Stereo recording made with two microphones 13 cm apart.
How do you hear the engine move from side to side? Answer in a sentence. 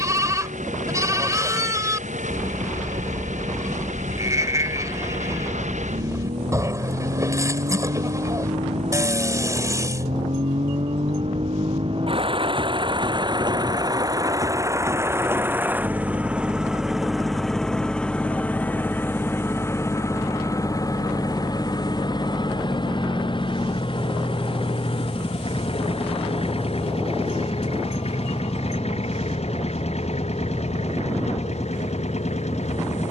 You can hear the engine move to the left.